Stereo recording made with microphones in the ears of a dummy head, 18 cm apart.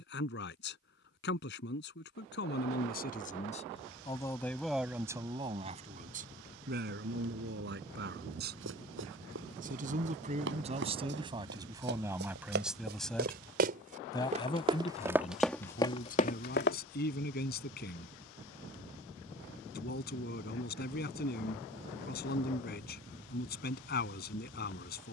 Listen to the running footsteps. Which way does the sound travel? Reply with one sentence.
In this clip you hear the running footsteps move from right to left.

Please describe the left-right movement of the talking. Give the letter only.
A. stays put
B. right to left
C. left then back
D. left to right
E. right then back
E.